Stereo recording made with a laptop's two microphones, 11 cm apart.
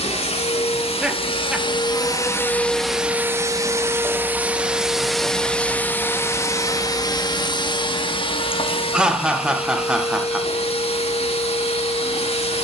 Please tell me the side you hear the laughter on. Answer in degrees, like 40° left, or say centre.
10° right.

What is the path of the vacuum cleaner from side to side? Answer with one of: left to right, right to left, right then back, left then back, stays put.
right then back.